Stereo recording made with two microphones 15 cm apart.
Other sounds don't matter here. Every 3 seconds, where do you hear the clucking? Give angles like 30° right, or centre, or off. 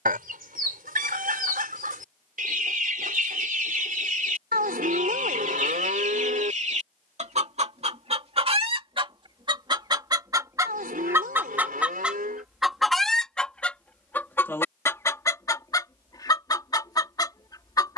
70° right, 60° right, 50° right, 20° right, 10° left, 20° left.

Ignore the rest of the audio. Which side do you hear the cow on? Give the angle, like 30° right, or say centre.
80° right.